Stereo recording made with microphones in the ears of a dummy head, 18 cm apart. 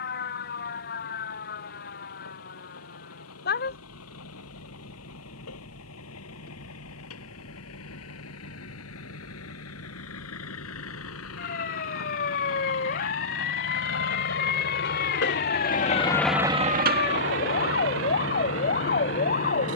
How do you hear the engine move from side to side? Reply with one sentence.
You can hear the engine travel towards the right.